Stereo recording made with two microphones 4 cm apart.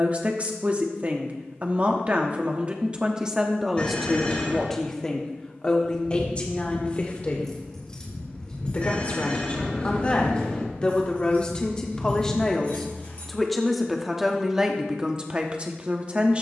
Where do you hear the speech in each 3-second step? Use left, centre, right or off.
right, centre, left, left, centre, right.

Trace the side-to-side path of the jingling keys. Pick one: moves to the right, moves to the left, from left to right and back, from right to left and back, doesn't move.
moves to the left.